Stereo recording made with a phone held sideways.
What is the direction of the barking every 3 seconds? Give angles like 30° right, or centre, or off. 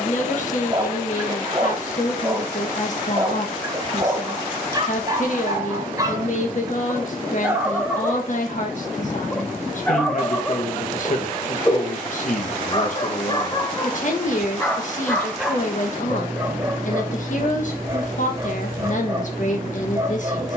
20° right, 20° right, 10° right, 20° left, 30° left, 10° right, 20° right.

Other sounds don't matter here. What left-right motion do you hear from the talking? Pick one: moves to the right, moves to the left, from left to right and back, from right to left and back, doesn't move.
doesn't move.